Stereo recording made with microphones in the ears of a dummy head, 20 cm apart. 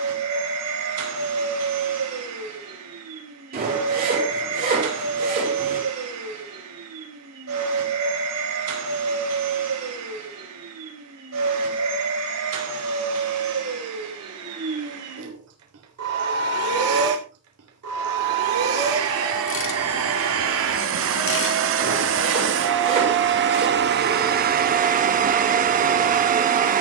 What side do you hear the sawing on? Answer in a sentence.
You can hear the sawing on the right.